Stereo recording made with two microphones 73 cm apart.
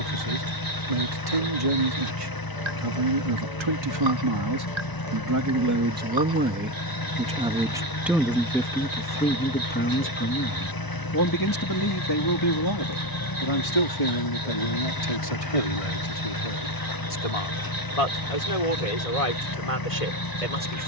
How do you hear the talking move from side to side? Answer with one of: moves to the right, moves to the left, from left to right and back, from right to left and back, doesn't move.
moves to the left.